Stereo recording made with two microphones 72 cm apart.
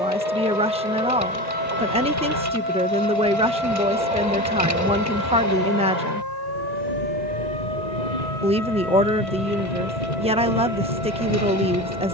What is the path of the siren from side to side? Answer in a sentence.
You can hear the siren travel towards the right.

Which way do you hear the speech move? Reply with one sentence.
In this clip you hear the speech stay put.